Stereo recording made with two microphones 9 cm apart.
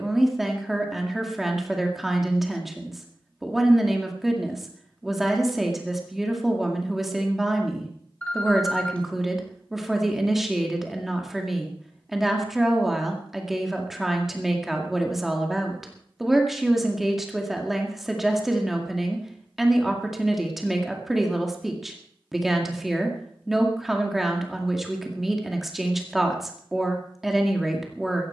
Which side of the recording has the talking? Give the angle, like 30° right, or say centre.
centre.